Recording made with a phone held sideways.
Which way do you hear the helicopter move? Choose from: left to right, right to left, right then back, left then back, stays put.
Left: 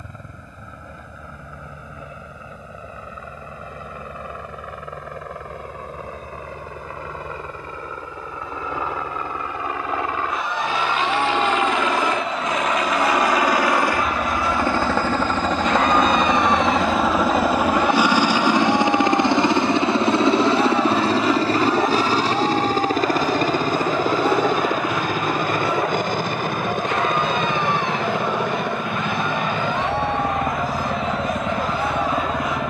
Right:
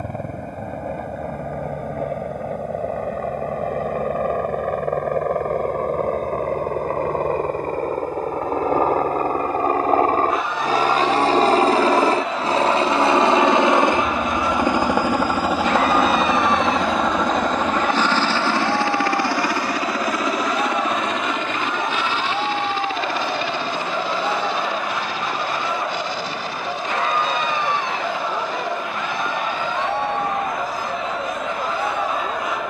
right to left.